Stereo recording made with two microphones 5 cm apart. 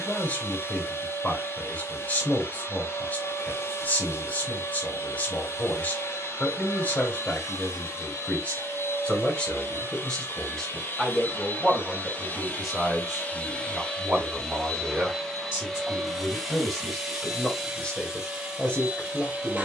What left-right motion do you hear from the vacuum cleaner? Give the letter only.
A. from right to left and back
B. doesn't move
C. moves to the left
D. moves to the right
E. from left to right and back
D.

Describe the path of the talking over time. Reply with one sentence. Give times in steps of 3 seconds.
In this clip you hear the talking on the left from 0 s, in the centre from 9 s and on the left from 18 s.